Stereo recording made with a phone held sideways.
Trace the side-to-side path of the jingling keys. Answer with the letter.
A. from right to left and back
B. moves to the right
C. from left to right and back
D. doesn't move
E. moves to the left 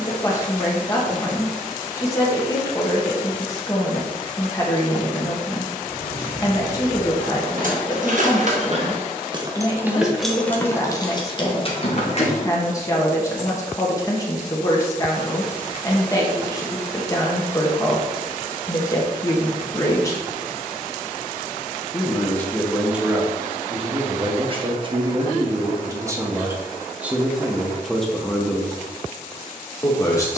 E.